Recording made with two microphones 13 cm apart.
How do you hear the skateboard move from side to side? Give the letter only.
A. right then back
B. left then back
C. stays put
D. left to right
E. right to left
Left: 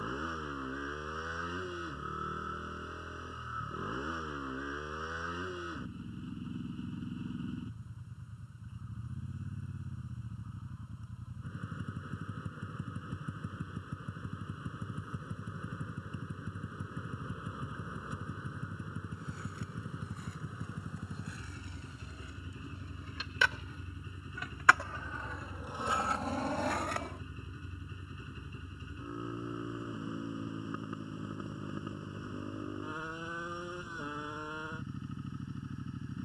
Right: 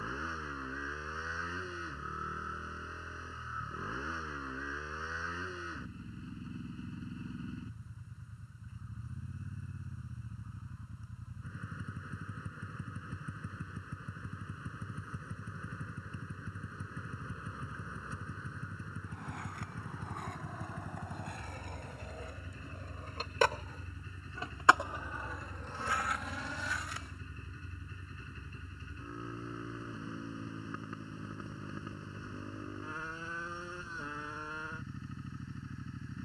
E.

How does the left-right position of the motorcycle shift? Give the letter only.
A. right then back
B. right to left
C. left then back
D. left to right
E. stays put
E.